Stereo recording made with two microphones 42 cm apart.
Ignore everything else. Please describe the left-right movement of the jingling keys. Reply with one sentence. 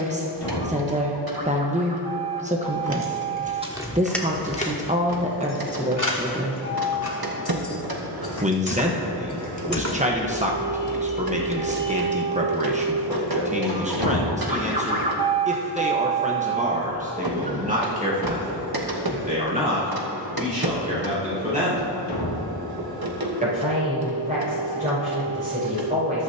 You can hear the jingling keys move from right to left and back again.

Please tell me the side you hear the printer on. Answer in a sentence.
In this clip you hear the printer on the right.